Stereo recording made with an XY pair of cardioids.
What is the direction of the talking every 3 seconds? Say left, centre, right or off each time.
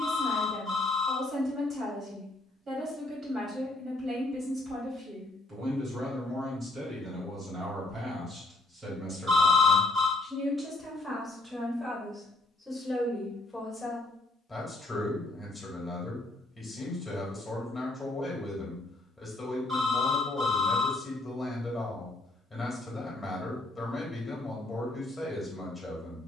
right, right, right, right, centre, centre, centre, centre, centre.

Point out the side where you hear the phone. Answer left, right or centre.
right.